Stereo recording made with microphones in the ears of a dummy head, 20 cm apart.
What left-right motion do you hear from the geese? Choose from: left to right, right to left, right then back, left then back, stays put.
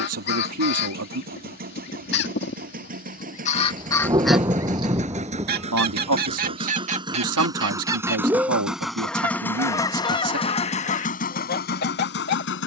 right then back.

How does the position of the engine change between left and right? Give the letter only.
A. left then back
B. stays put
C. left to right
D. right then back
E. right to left
E.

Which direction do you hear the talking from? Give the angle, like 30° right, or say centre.
70° right.